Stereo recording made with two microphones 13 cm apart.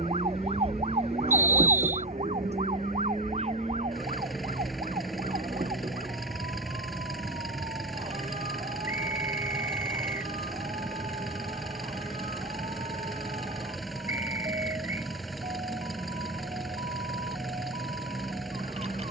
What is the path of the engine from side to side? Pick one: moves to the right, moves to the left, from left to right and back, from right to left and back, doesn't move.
doesn't move.